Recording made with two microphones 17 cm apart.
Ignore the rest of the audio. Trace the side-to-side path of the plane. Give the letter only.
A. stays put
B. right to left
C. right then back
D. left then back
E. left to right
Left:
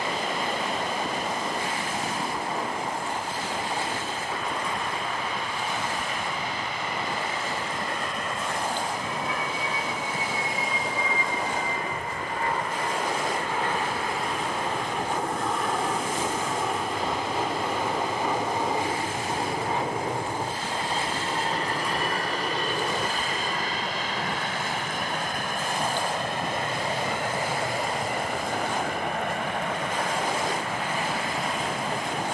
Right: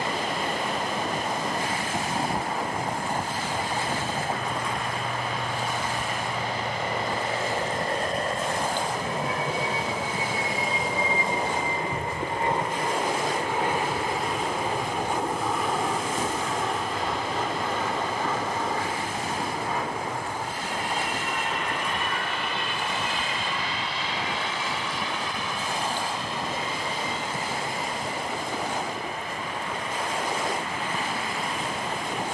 B.